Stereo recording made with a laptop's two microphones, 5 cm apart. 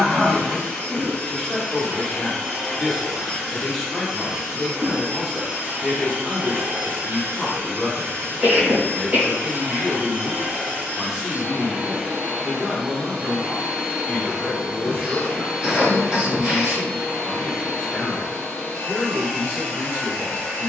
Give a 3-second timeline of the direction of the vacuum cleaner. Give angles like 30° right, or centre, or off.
20° left, 10° right, 50° right, 40° right, 10° right, 10° left, 10° left.